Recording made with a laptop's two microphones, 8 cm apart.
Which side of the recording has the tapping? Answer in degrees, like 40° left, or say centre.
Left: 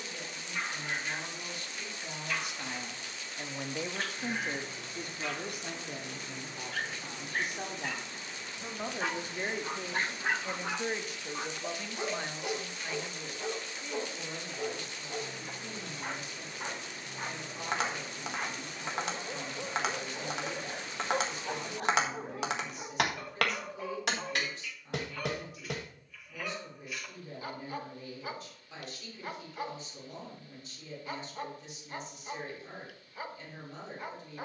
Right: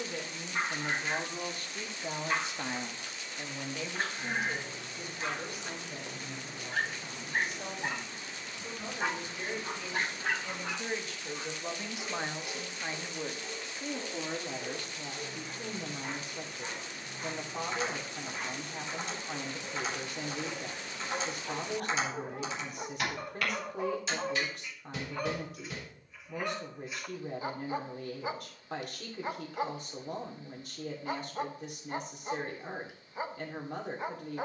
70° left.